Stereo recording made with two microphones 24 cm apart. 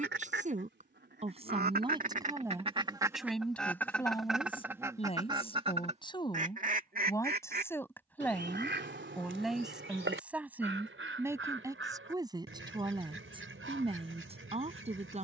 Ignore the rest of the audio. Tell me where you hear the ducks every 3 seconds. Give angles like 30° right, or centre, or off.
40° right, 10° right, 40° right, 60° right, 60° right.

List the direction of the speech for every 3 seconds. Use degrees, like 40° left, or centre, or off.
20° right, 20° left, 10° left, 10° right, 20° right.